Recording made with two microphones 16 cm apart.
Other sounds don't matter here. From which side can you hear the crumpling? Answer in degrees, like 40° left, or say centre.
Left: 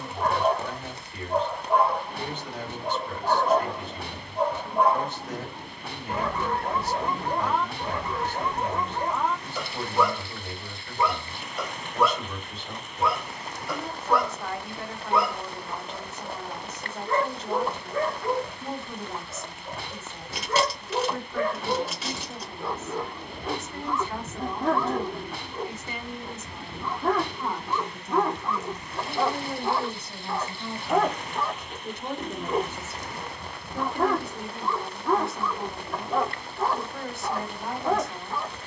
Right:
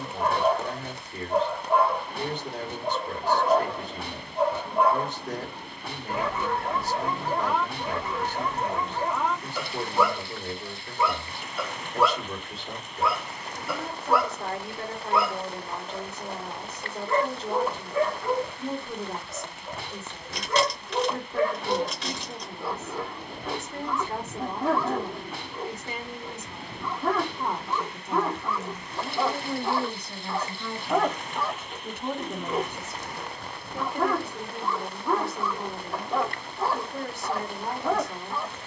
10° left.